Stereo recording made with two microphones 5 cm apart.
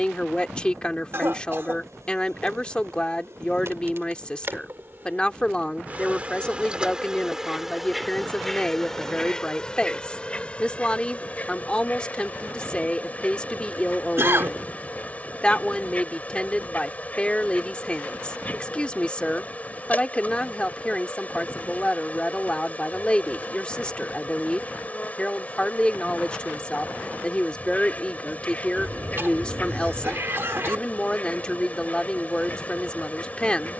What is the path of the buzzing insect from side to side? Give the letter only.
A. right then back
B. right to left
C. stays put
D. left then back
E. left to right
B.